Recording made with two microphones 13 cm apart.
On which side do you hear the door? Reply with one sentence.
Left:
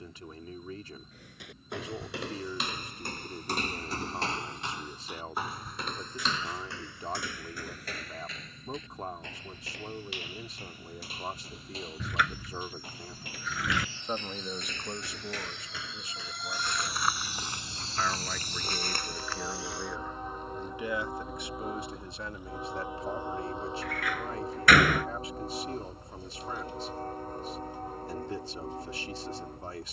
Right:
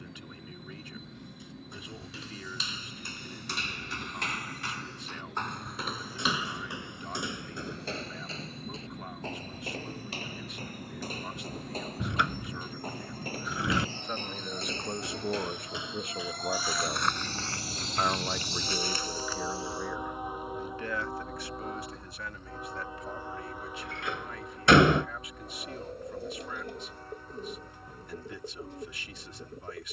You can hear the door on the right.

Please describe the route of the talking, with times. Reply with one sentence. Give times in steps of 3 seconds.
In this clip you hear the talking on the left from 0 s, on the right from 15 s, in the centre from 18 s and on the left from 21 s.